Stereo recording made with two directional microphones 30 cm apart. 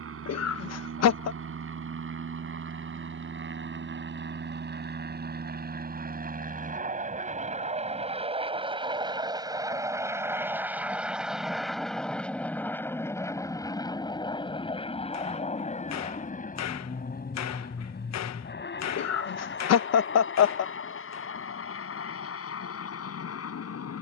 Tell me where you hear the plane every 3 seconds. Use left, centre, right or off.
right, right, right, centre, centre, left, left, left.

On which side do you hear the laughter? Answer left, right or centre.
left.